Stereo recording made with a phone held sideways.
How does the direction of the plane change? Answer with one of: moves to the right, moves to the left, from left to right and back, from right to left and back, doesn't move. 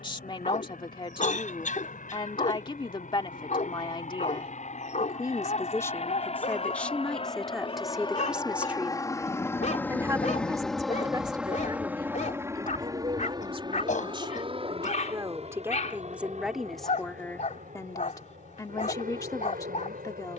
moves to the right.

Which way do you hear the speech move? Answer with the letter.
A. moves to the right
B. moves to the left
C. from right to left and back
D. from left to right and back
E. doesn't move
D.